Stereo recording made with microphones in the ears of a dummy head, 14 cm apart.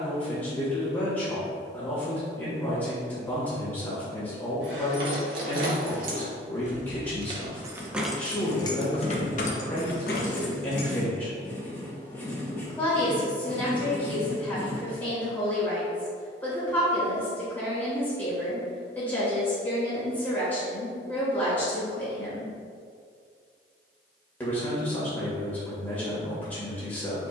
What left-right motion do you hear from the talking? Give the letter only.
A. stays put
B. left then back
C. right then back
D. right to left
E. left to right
A.